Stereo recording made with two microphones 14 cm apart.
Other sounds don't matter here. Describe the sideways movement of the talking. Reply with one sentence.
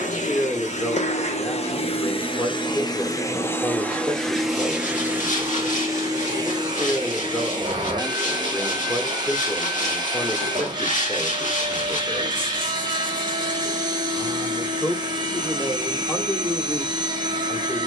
You can hear the talking stay in one place.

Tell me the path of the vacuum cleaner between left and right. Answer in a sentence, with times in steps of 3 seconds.
You can hear the vacuum cleaner on the left from 0 s, in the centre from 3 s and on the right from 6 s.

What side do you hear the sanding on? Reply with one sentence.
You can hear the sanding on the left.